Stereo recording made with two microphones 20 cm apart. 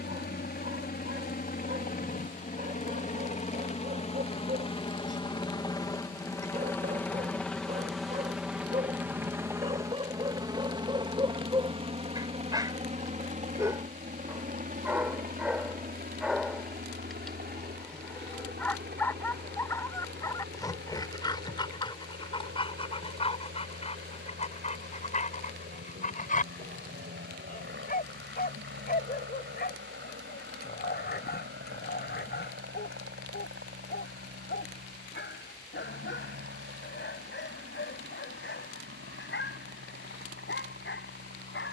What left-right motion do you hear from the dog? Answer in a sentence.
In this clip you hear the dog move to the left.